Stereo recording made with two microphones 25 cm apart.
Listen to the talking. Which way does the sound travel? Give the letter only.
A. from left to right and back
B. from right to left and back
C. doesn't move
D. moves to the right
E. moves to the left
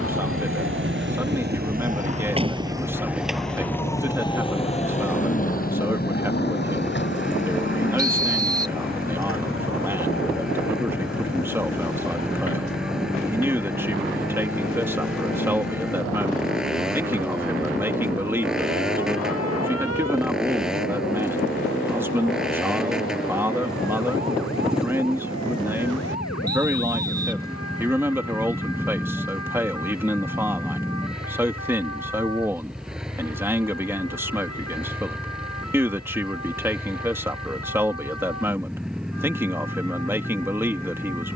C.